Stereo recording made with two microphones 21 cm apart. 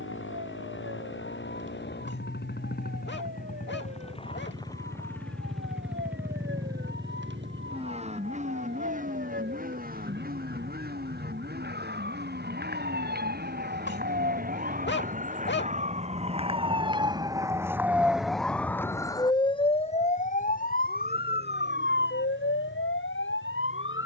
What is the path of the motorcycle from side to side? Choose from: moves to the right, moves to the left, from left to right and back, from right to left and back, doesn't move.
moves to the right.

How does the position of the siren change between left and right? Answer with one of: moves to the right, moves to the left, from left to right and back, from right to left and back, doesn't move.
moves to the left.